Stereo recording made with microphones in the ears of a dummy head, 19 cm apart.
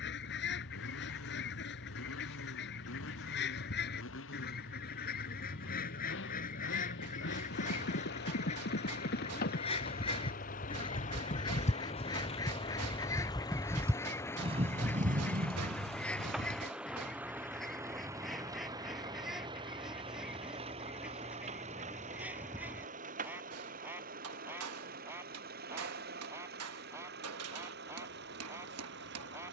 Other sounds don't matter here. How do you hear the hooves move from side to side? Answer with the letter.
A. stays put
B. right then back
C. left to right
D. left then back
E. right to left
C.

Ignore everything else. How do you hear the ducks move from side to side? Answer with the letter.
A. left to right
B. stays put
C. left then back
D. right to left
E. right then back
A.